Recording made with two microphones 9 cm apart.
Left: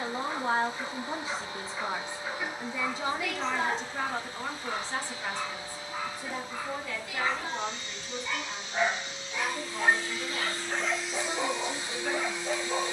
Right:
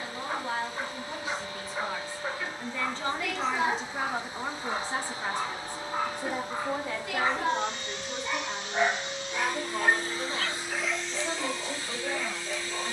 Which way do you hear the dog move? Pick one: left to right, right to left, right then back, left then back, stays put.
right to left.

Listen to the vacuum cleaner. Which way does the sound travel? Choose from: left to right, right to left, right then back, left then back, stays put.
right then back.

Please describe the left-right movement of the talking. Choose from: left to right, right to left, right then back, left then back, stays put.
left to right.